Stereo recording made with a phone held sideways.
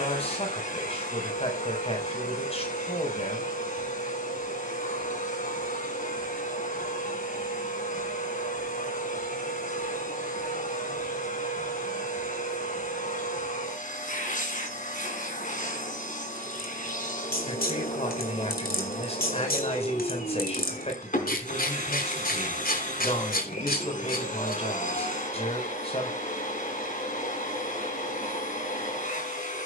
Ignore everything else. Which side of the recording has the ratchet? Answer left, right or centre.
left.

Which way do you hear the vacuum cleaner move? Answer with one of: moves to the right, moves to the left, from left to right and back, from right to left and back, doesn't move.
doesn't move.